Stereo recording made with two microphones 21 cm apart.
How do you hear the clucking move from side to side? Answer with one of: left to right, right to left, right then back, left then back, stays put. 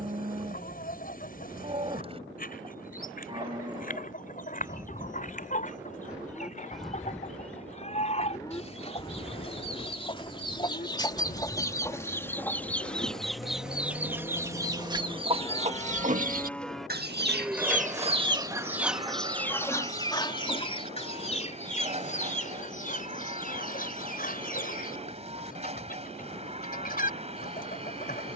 right then back.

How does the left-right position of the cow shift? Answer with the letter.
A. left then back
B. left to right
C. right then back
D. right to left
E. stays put
A.